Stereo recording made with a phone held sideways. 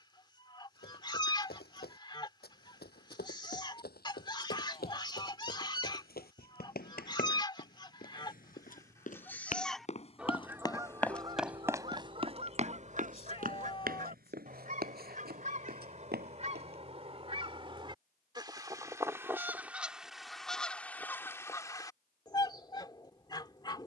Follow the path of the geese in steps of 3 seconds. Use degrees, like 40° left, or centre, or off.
30° left, 30° left, 30° left, 10° right, 50° right, 40° right, 10° right, 20° left.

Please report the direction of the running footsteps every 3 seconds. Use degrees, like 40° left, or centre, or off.
80° left, 80° left, 70° left, 20° left, 60° right, 80° right, off, off.